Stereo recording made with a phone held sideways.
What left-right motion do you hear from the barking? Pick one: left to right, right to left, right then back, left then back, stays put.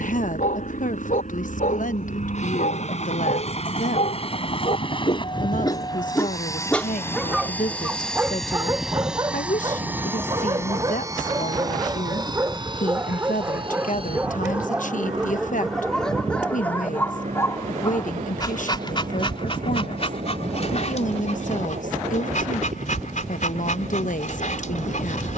right then back.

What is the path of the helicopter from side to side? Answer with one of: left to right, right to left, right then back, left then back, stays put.
left to right.